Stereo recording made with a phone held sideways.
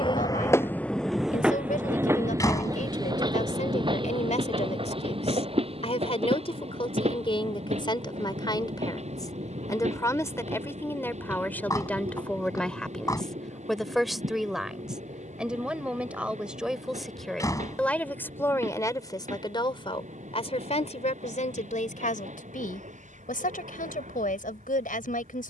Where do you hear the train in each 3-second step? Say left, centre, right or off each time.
centre, right, right, right, right, right, right, right, right.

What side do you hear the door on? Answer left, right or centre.
left.